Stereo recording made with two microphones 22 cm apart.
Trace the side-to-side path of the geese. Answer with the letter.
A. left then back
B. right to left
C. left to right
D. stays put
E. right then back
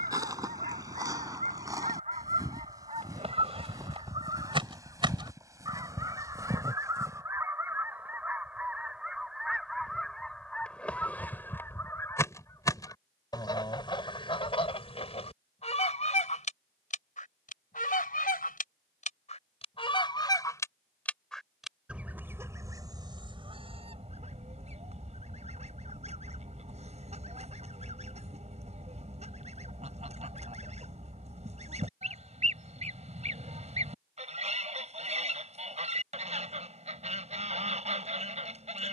A.